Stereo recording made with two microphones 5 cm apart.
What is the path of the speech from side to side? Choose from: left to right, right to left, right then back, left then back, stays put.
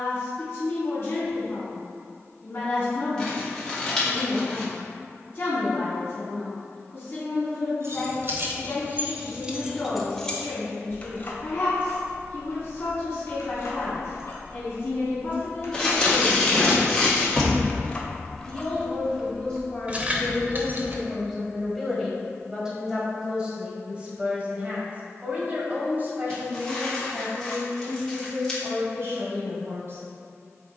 left to right.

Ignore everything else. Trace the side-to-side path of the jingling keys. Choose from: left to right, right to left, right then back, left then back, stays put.
left then back.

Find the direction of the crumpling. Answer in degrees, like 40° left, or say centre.
10° left.